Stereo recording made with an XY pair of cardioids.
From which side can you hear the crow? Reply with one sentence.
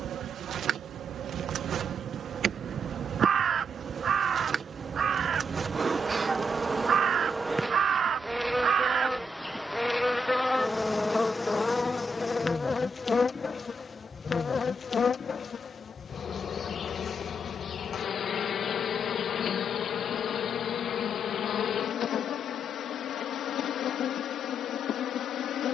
You can hear the crow on the right.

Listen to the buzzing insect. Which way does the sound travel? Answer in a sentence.
In this clip you hear the buzzing insect travel towards the left.